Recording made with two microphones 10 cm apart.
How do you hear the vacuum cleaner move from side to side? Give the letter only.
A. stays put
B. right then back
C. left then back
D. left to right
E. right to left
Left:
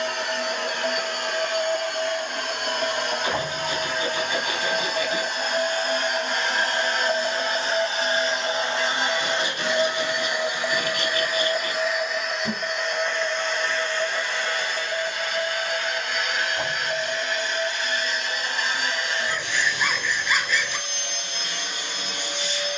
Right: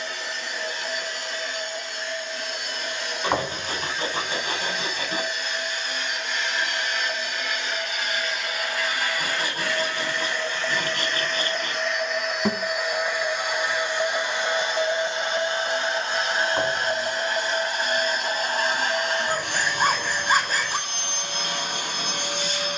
D.